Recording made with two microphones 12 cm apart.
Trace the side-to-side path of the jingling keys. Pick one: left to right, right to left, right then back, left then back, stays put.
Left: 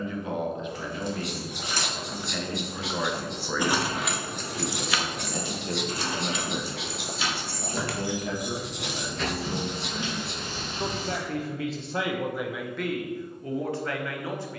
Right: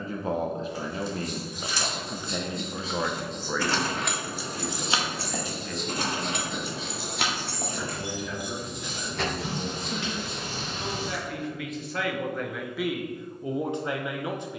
left to right.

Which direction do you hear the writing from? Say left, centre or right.
left.